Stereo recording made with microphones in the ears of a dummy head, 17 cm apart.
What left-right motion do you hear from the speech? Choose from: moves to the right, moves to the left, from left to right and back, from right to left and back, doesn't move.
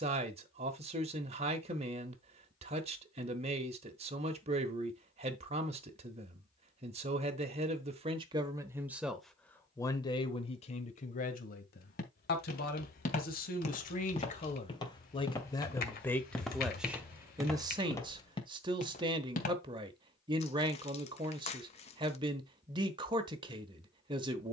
from right to left and back.